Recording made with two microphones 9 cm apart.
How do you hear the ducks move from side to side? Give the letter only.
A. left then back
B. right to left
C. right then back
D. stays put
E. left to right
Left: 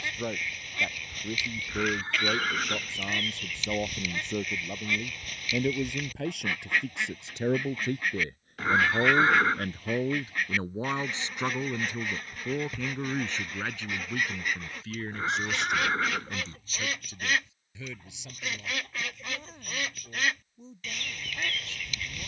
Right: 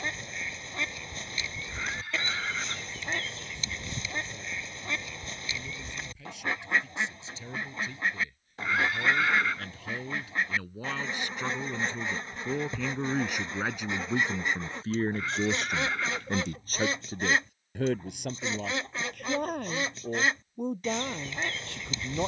D.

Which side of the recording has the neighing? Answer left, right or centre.
left.